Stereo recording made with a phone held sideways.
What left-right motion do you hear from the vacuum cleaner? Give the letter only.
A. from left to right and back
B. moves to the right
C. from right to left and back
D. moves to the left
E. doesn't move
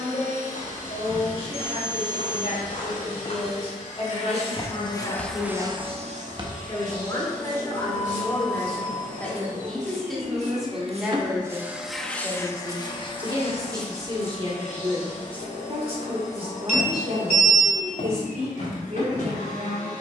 A.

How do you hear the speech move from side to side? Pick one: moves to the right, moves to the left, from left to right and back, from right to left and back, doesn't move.
moves to the right.